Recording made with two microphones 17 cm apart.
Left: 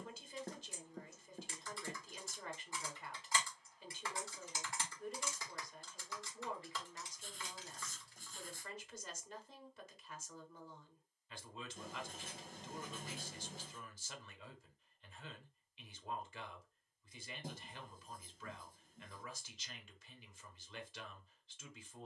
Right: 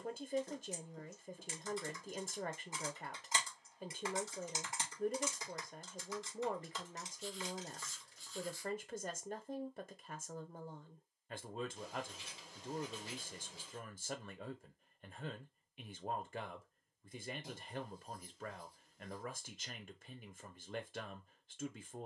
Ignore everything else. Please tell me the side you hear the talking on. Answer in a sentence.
In this clip you hear the talking on the right.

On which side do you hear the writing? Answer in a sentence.
In this clip you hear the writing on the left.